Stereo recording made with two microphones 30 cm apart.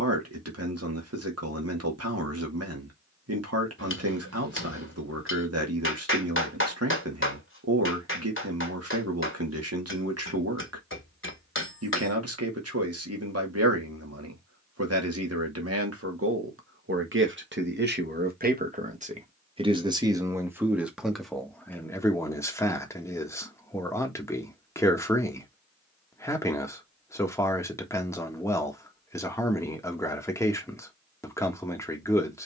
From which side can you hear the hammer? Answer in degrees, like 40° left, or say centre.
40° left.